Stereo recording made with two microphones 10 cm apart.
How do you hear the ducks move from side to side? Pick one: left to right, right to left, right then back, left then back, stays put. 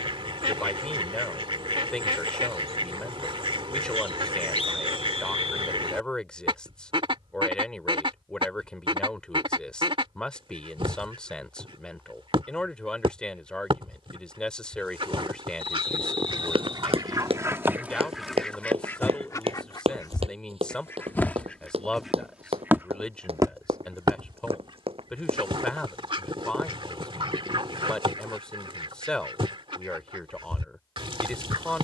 left then back.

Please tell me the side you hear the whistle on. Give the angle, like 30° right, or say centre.
80° left.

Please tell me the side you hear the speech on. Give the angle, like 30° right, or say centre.
10° left.